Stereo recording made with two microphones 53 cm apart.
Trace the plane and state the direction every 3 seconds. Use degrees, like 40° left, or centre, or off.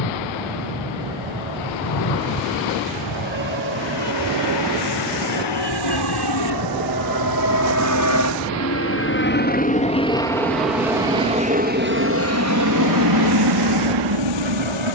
60° left, 50° left, 40° left, centre, 40° right.